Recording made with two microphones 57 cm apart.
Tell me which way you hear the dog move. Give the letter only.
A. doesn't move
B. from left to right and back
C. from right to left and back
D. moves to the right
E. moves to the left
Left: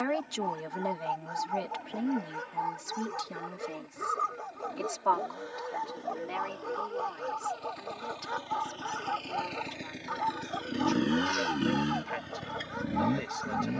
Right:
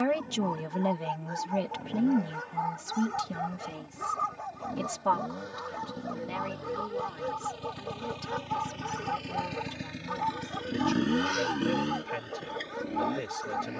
D.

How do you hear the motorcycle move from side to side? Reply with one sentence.
In this clip you hear the motorcycle travel towards the left.